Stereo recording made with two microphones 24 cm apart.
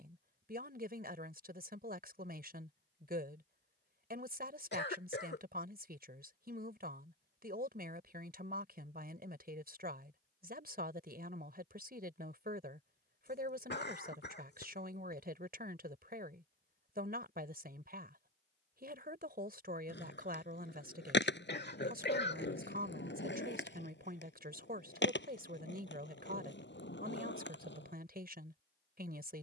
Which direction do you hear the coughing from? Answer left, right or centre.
left.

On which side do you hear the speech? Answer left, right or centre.
right.